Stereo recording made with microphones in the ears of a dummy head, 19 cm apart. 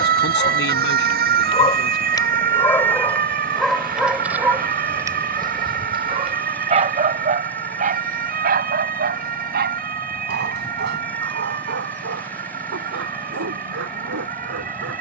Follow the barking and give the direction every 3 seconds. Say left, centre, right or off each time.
left, centre, right, right, right.